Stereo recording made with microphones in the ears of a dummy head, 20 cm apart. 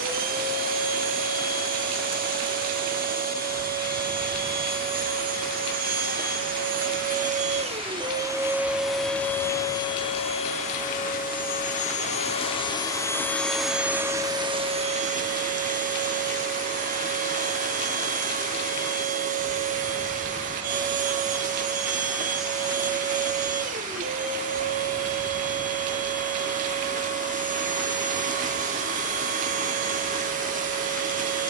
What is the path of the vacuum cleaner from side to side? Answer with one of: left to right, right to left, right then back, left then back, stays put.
left then back.